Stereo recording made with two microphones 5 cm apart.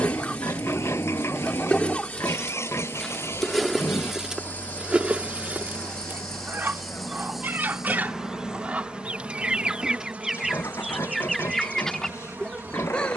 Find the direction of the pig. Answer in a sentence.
You can hear the pig on the left.